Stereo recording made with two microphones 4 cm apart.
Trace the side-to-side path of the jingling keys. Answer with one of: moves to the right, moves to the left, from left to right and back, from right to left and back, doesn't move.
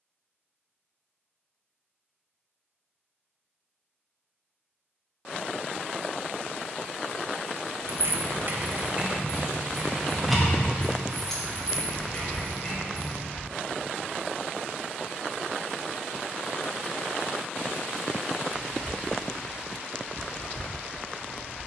moves to the left.